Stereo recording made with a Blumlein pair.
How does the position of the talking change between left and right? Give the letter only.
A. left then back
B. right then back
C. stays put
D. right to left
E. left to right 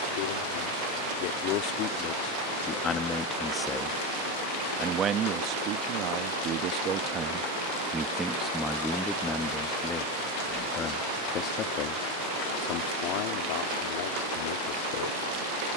B.